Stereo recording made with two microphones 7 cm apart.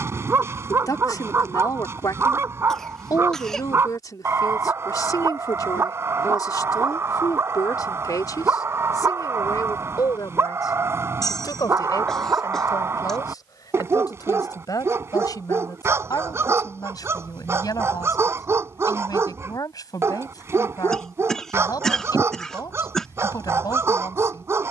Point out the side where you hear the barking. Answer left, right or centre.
right.